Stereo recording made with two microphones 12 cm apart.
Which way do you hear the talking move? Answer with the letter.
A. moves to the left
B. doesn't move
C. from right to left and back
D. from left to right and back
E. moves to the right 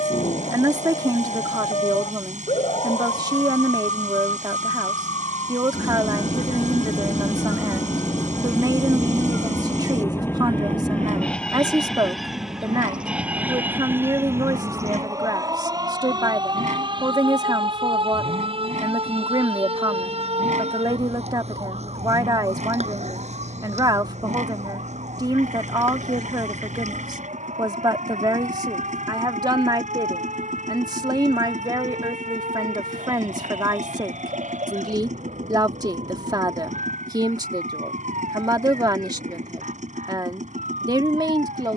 B.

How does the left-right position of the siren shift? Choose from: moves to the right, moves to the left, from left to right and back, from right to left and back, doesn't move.
moves to the right.